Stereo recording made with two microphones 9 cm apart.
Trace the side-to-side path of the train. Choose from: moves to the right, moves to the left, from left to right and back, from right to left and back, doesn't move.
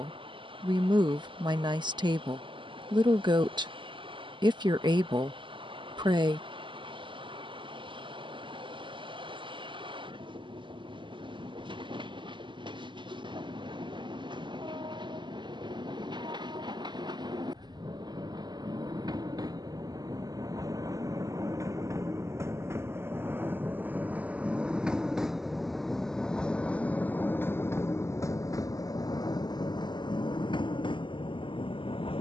moves to the left.